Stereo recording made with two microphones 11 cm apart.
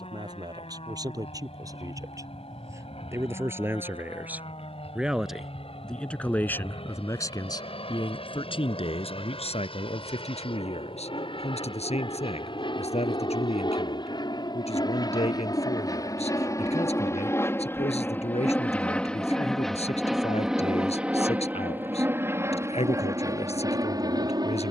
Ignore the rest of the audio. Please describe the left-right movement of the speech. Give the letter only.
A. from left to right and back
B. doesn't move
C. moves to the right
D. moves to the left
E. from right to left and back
D.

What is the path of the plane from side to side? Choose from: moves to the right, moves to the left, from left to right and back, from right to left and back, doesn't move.
moves to the right.